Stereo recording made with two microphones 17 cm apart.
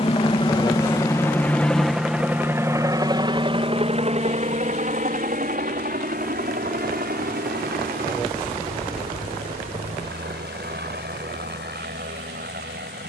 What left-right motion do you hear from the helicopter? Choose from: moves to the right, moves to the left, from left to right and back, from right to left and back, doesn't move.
moves to the right.